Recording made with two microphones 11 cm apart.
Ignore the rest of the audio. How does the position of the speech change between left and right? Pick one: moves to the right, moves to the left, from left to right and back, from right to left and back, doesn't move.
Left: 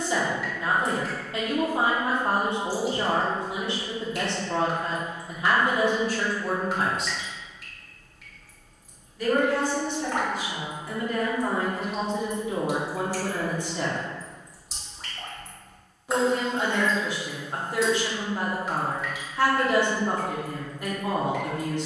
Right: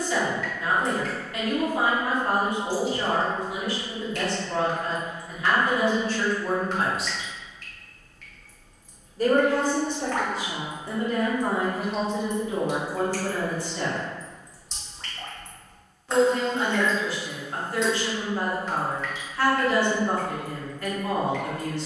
from left to right and back.